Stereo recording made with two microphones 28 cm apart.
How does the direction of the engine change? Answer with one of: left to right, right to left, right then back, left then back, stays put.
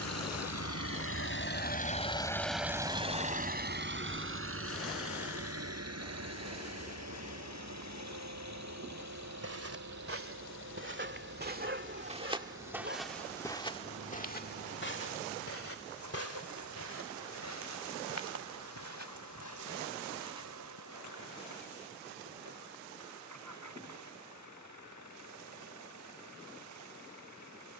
left to right.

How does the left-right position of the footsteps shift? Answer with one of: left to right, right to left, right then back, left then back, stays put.
right to left.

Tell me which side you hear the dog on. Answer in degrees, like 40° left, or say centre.
40° right.